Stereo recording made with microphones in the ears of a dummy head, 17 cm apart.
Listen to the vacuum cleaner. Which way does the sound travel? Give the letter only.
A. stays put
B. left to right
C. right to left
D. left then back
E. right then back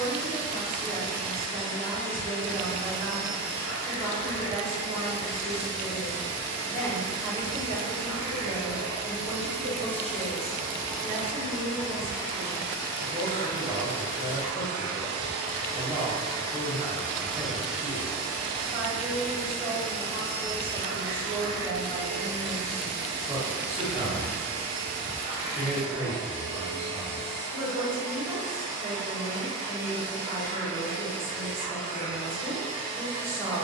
E.